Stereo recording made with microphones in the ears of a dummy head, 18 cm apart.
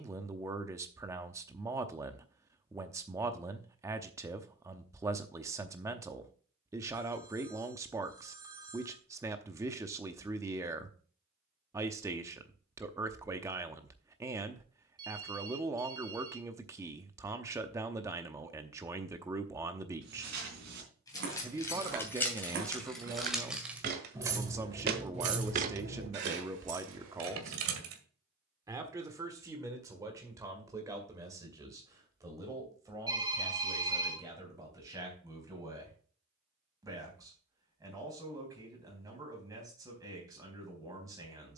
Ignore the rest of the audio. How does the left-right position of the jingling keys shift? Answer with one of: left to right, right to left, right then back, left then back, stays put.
left to right.